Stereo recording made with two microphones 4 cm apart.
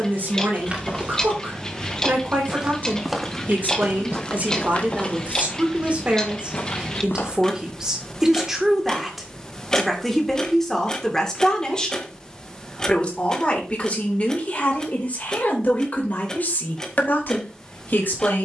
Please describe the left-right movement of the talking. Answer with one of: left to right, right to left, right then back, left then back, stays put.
right to left.